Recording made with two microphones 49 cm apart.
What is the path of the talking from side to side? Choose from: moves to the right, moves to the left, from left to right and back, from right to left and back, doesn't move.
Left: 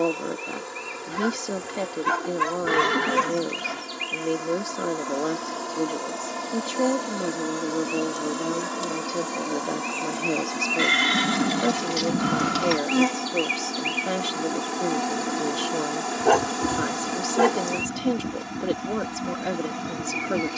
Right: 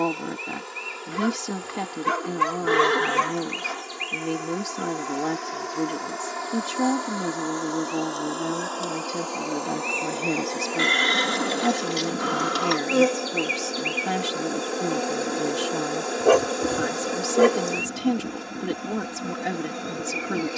doesn't move.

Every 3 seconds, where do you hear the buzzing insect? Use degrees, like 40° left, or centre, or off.
70° left, 60° left, 50° left, 30° left, 20° left, 20° left, 20° left.